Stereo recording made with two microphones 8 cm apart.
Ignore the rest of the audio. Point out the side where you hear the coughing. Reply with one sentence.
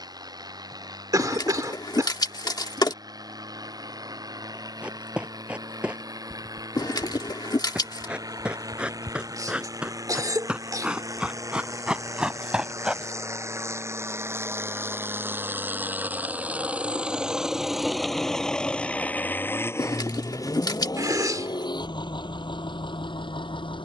You can hear the coughing on the right.